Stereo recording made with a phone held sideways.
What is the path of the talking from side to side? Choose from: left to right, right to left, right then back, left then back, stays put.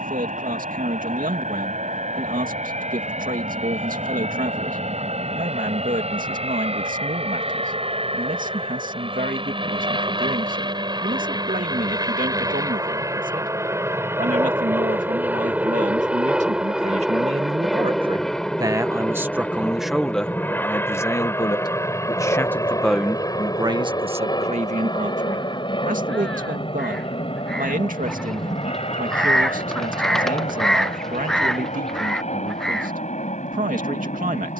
left then back.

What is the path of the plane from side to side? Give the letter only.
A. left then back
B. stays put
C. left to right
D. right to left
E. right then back
D.